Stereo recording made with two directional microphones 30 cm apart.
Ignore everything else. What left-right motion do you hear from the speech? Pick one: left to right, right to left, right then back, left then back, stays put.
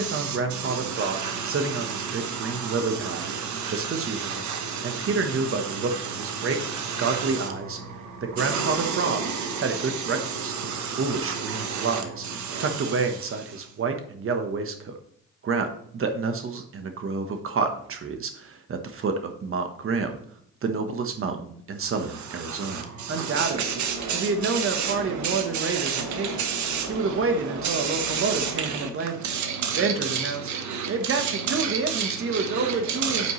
stays put.